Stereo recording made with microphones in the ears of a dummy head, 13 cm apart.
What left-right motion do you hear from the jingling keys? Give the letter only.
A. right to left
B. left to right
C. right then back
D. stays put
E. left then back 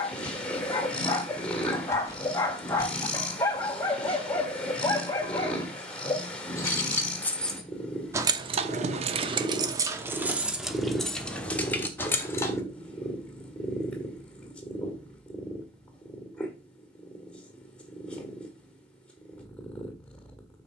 C.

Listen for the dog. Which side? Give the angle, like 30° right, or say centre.
20° left.